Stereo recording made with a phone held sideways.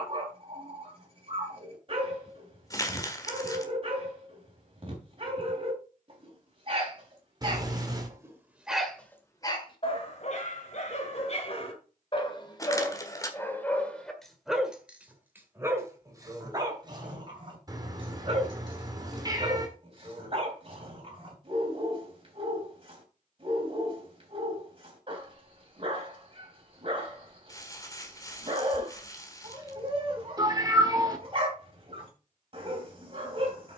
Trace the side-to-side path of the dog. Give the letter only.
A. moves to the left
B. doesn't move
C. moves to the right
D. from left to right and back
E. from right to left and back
E.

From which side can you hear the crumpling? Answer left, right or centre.
left.